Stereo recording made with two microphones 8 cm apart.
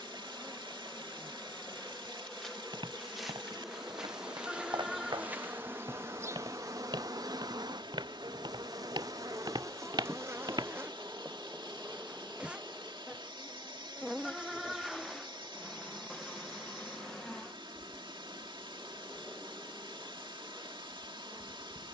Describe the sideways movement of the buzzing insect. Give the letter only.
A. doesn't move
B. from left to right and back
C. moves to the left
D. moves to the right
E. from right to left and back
B.